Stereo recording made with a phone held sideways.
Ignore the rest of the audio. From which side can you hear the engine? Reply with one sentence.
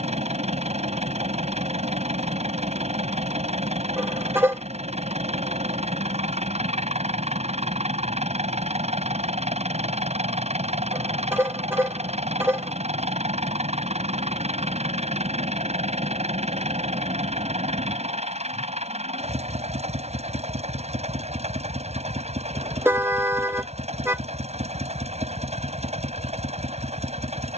In this clip you hear the engine on the right.